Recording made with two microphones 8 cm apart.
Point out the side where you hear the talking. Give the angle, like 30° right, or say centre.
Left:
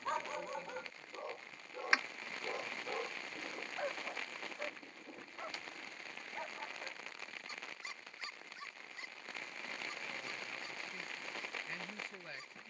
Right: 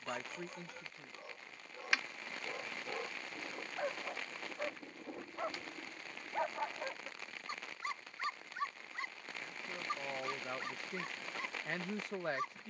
60° right.